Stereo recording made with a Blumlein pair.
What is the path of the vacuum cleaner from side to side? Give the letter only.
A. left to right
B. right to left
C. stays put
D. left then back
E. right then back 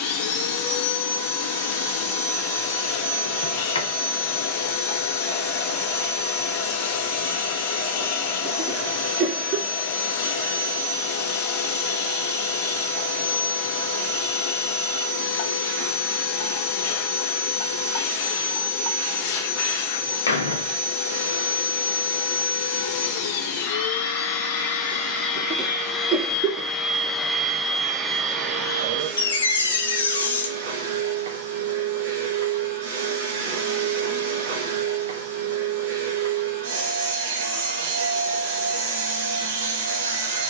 A.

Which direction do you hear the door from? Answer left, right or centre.
left.